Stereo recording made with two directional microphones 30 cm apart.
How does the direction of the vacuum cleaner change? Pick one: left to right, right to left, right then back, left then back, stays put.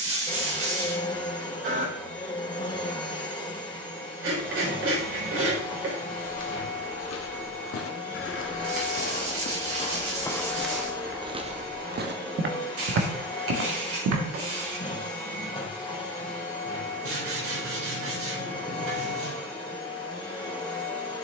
stays put.